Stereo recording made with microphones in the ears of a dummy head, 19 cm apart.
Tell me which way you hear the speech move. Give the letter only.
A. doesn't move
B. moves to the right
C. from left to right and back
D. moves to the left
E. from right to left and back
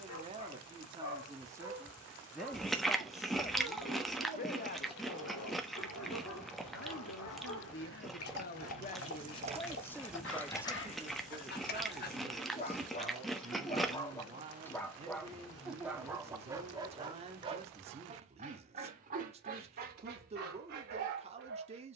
E.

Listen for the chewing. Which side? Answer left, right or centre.
centre.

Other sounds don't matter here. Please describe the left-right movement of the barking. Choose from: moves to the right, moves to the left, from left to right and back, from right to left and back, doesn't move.
moves to the right.